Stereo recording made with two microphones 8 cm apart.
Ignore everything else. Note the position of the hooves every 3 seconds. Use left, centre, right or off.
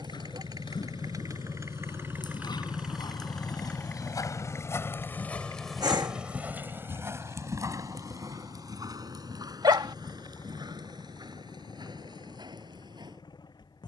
left, left, right, right, right.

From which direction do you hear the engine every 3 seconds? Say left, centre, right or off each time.
right, left, left, left, left.